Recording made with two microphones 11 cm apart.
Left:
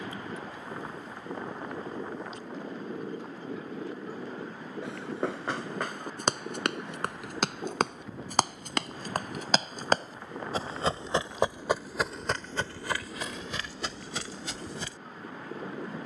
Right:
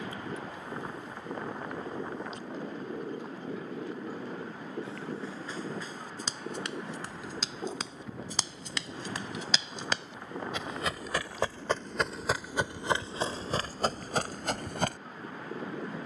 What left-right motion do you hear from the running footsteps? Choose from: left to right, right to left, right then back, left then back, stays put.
left to right.